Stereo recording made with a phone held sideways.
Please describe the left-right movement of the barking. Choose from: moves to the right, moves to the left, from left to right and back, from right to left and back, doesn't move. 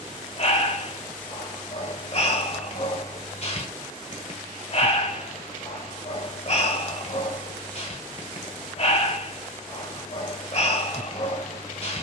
doesn't move.